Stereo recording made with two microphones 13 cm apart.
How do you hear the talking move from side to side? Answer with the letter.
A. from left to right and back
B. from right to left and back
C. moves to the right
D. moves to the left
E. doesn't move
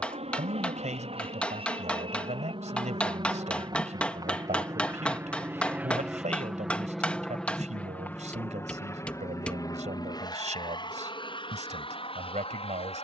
E.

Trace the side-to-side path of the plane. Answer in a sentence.
In this clip you hear the plane go from the right side to the left.